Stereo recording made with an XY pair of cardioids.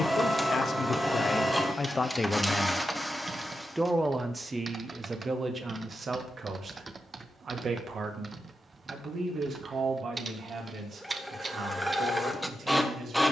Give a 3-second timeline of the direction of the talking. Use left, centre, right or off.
left, right, right, right, right.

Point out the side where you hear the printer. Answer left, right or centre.
centre.